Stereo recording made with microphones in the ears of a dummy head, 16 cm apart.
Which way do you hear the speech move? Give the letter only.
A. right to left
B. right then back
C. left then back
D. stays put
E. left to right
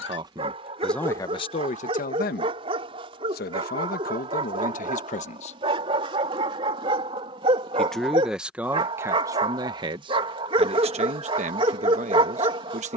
C.